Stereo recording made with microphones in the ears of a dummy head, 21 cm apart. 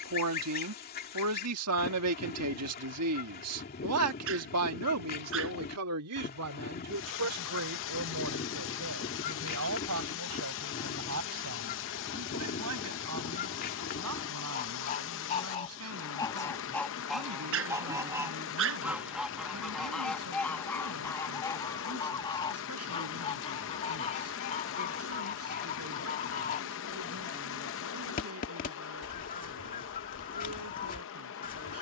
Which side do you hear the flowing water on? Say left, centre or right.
left.